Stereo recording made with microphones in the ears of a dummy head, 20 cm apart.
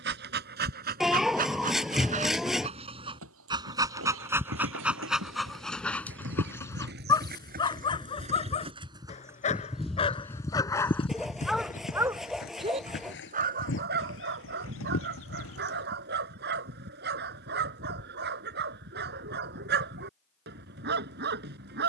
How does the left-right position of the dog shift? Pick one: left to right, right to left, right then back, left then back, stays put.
left then back.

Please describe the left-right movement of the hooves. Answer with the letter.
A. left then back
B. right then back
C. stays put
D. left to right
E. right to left
E.